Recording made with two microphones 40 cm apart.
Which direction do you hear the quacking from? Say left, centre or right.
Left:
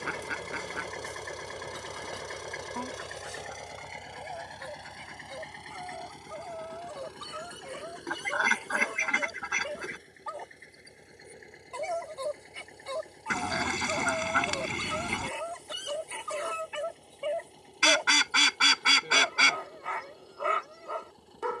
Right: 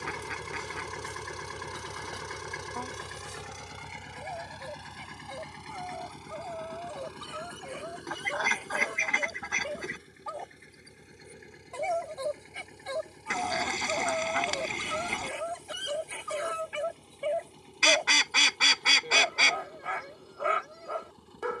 left.